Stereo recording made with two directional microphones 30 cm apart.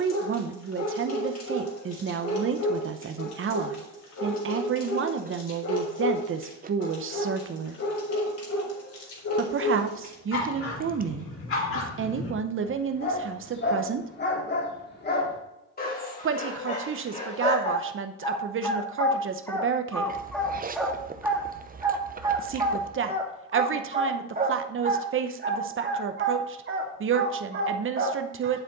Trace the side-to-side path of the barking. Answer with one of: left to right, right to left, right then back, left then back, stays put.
left to right.